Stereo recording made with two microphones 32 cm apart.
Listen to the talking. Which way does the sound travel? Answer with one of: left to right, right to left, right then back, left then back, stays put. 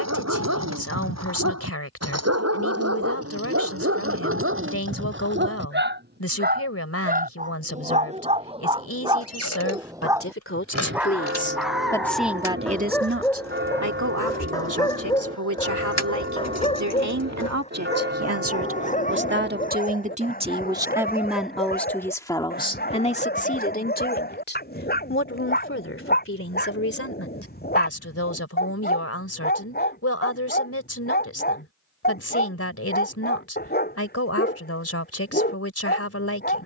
right then back.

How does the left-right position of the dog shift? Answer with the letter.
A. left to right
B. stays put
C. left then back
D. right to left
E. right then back
D.